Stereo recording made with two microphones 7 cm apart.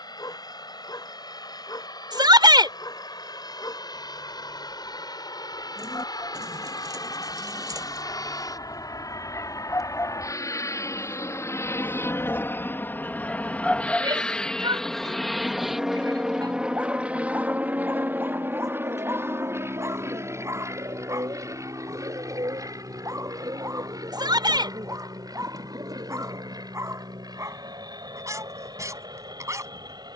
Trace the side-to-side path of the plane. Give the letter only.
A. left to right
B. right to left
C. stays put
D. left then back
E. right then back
A.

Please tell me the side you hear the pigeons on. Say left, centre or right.
right.